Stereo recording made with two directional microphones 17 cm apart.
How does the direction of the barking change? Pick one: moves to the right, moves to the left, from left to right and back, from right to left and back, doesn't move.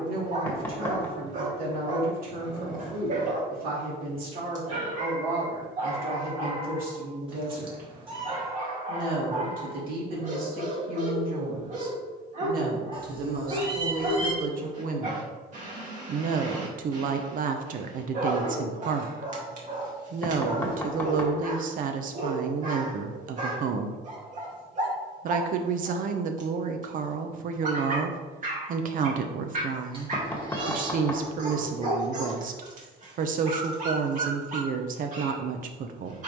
doesn't move.